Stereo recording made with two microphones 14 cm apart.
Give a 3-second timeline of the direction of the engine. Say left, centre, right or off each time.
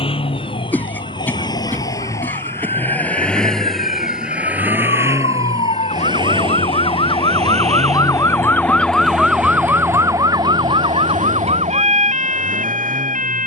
left, centre, right, right, right.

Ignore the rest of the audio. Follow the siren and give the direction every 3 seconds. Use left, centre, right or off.
left, left, left, right, right.